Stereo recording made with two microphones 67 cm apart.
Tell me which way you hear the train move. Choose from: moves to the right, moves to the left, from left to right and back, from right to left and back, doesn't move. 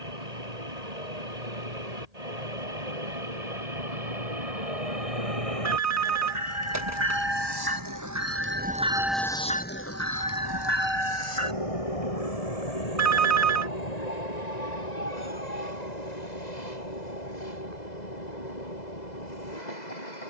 moves to the left.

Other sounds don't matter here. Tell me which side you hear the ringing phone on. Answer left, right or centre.
right.